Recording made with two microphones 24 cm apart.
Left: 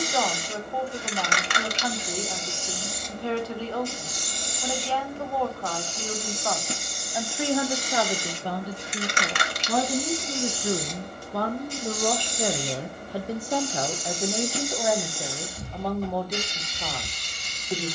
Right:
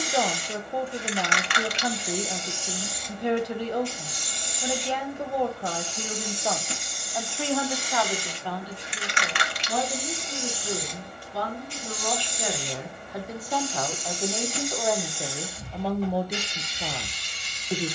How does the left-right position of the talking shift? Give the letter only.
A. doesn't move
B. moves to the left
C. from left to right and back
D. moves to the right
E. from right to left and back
E.